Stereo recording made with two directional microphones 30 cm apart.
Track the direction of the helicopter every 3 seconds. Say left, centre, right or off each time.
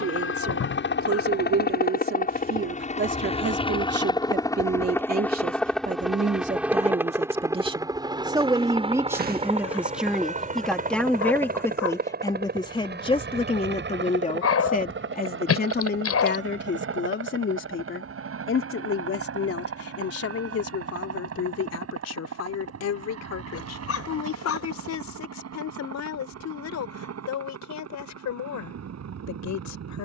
left, centre, centre, right, right, right, right, right, right, right.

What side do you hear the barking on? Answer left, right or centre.
left.